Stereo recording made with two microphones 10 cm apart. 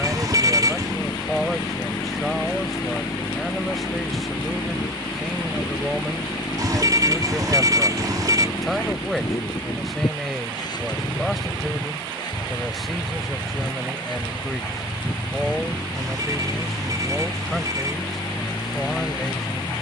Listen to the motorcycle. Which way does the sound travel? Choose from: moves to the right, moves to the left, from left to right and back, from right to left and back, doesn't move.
doesn't move.